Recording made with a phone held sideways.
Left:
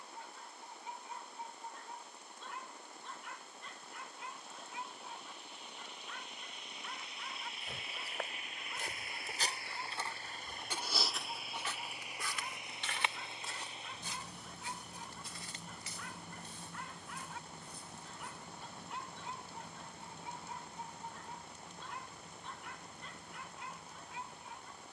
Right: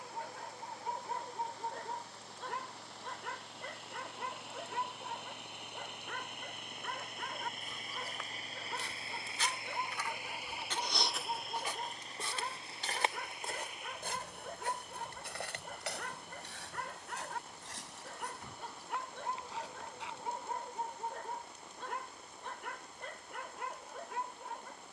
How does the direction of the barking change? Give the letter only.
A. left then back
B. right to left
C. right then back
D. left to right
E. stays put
E.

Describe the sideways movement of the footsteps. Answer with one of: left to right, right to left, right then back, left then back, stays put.
left to right.